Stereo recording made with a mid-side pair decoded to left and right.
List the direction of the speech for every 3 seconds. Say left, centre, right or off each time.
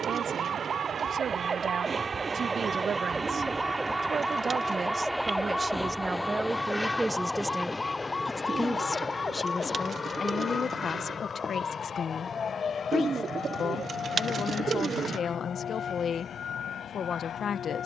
right, right, centre, left, left, left.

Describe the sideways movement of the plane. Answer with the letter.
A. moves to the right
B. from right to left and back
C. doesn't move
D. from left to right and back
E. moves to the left
E.